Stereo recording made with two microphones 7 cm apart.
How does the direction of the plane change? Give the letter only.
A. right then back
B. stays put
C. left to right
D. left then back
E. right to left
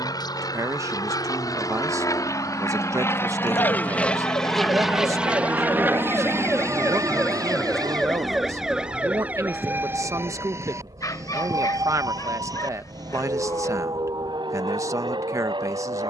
C.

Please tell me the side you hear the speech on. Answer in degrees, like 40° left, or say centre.
50° right.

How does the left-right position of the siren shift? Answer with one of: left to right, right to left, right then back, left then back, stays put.
left to right.